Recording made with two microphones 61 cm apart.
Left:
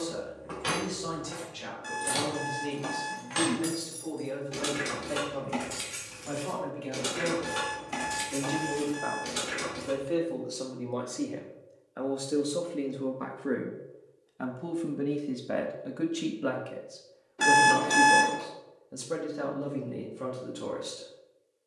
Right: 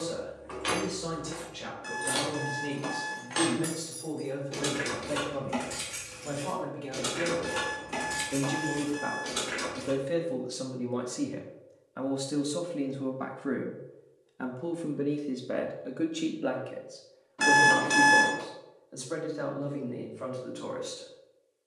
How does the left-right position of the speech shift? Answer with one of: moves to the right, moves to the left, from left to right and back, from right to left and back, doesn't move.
moves to the left.